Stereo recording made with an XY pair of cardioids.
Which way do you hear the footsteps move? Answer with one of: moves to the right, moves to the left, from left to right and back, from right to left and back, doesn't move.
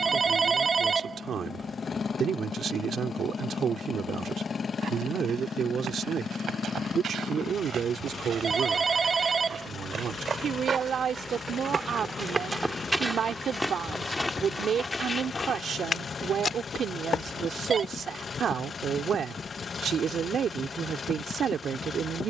moves to the left.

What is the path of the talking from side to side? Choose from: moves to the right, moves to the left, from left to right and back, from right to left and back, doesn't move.
doesn't move.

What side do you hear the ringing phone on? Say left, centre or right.
right.